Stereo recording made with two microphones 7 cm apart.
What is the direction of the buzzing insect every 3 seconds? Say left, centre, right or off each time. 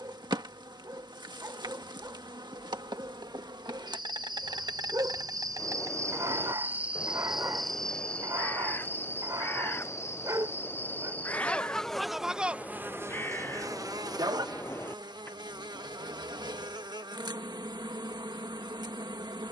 right, right, centre, left, right, right, right.